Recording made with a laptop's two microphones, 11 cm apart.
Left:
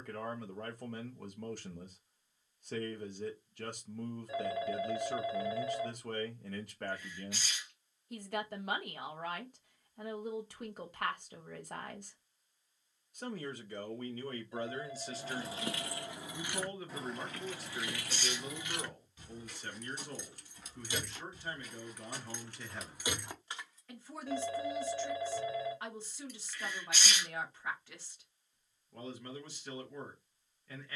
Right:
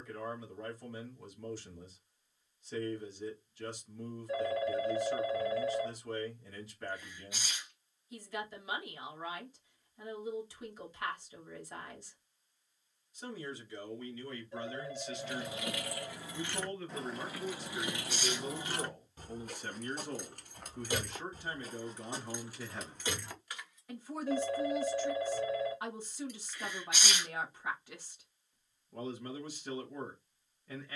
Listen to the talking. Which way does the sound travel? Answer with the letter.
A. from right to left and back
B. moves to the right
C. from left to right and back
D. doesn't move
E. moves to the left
B.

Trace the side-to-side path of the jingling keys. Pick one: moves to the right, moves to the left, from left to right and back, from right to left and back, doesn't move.
from left to right and back.